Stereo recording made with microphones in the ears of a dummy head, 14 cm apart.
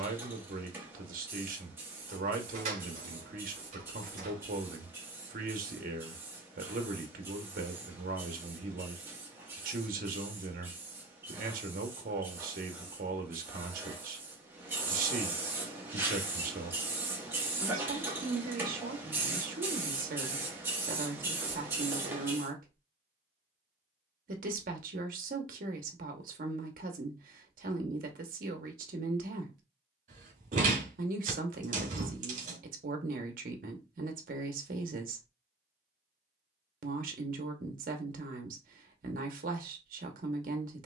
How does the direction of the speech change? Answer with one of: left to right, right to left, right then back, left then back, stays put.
stays put.